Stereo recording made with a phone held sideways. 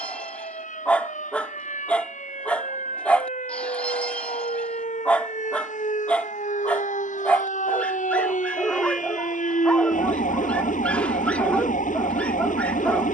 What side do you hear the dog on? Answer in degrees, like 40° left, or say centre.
10° left.